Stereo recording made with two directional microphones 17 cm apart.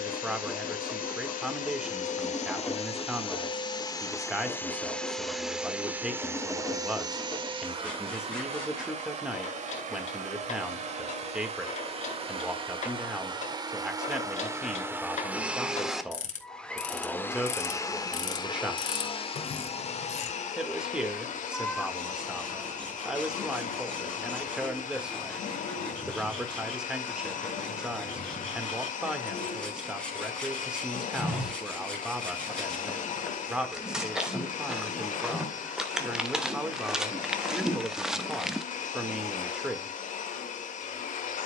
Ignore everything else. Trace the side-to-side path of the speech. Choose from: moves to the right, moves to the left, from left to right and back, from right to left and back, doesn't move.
doesn't move.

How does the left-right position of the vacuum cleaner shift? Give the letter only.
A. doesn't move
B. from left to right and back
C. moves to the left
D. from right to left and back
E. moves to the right
B.